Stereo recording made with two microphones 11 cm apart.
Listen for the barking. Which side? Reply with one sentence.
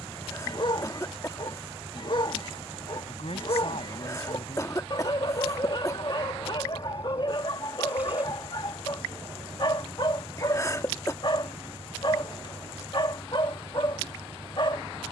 You can hear the barking on the left.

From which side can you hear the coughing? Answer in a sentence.
In this clip you hear the coughing on the left.